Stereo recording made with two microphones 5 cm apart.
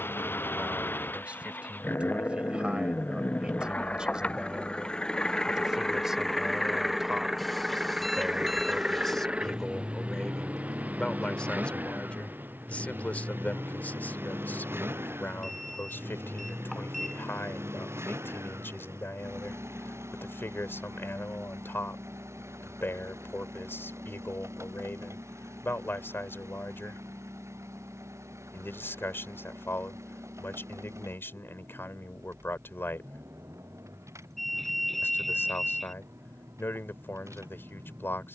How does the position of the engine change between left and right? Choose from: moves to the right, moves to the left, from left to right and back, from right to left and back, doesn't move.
moves to the right.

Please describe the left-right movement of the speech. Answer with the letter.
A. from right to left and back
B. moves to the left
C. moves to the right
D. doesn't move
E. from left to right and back
B.